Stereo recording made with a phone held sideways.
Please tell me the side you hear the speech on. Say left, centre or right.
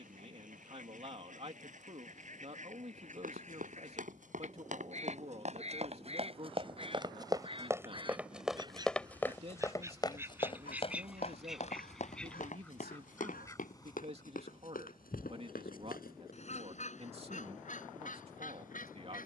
right.